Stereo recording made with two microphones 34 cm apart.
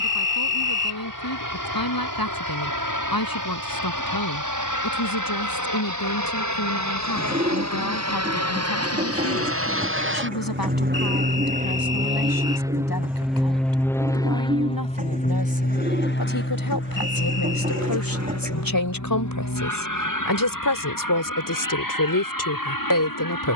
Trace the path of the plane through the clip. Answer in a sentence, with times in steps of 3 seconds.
You can hear the plane on the right from 0 s, in the centre from 12 s and on the left from 15 s.